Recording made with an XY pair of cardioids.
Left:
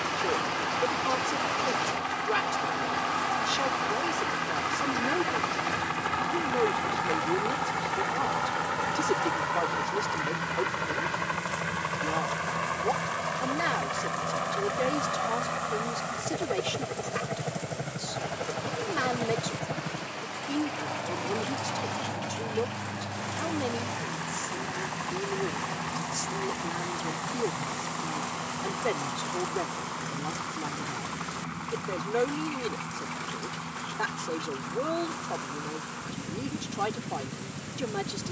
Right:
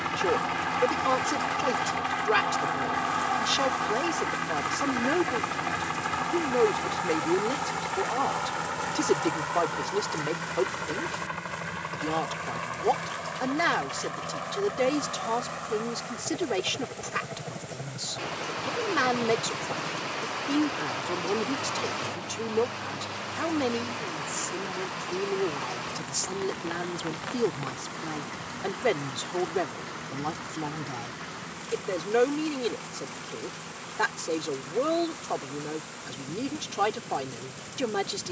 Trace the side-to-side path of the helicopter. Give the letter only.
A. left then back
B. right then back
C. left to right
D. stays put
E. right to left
E.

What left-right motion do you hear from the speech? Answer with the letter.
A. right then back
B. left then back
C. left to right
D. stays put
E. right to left
D.